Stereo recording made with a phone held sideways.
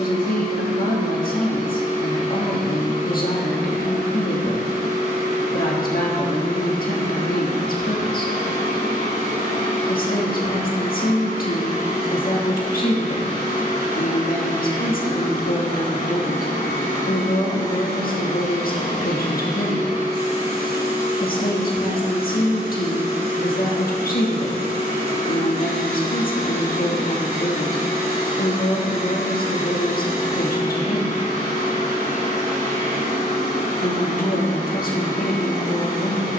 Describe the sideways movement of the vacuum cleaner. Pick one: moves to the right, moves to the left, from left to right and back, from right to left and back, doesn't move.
doesn't move.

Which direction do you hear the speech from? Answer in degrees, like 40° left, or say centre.
70° left.